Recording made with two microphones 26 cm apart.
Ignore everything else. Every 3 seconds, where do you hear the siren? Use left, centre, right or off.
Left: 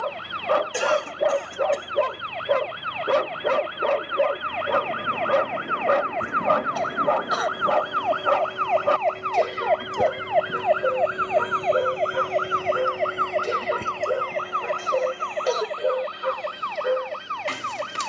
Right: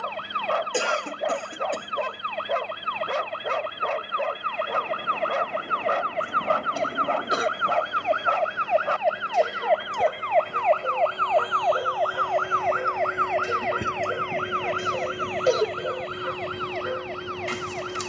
right, right, right, centre, left, left.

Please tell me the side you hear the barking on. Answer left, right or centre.
left.